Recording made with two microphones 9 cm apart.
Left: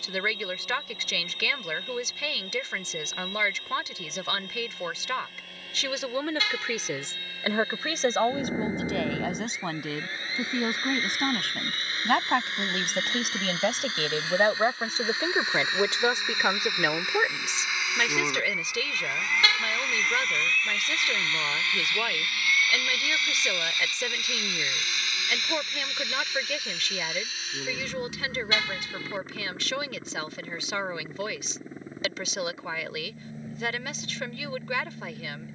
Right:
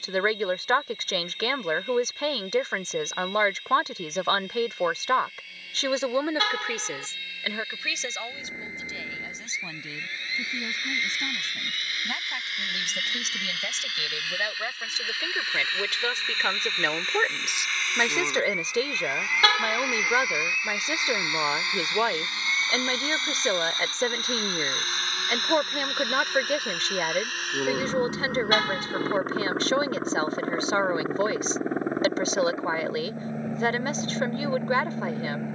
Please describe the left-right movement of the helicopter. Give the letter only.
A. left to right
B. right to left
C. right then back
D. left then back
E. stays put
A.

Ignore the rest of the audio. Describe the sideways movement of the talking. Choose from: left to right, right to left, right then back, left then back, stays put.
left then back.